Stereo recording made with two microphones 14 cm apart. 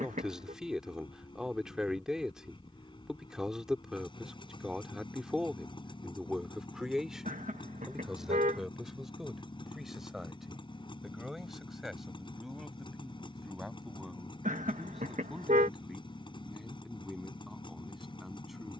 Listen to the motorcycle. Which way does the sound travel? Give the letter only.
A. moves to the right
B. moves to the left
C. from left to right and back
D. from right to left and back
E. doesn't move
E.